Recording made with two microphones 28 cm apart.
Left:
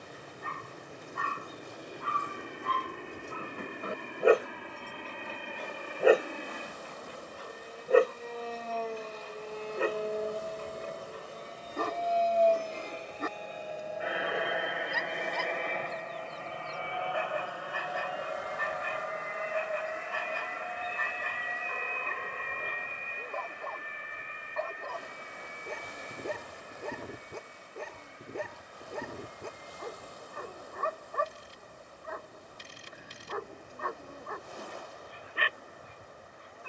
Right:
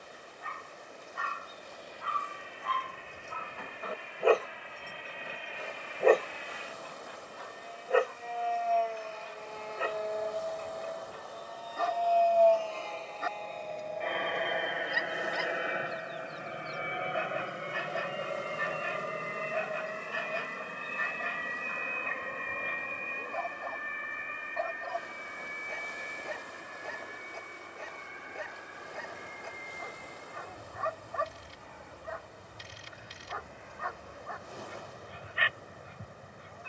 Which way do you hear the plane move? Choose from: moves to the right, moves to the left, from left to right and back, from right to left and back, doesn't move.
moves to the right.